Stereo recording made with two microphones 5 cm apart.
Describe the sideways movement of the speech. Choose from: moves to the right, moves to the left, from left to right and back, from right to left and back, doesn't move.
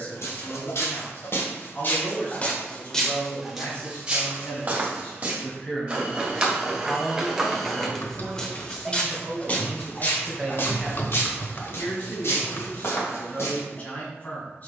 from left to right and back.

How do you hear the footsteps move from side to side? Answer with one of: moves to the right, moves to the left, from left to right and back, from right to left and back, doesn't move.
from left to right and back.